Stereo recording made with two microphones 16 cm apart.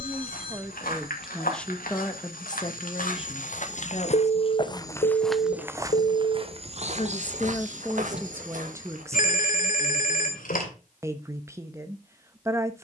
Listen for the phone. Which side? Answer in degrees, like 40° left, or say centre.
70° left.